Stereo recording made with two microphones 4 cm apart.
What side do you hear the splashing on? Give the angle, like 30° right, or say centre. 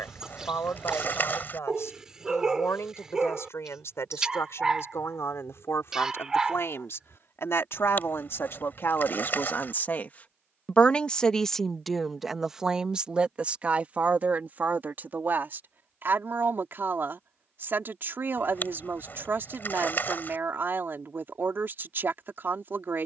50° left.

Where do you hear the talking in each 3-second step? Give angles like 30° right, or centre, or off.
80° left, 80° left, 70° left, 30° left, 30° right, 50° right, 50° right, 50° right.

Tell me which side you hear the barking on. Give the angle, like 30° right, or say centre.
10° right.